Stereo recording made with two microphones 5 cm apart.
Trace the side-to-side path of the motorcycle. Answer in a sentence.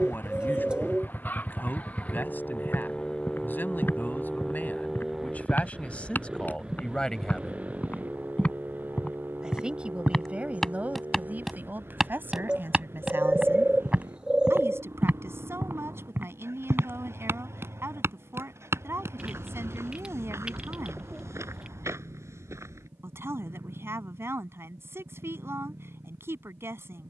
In this clip you hear the motorcycle go from the left side to the right.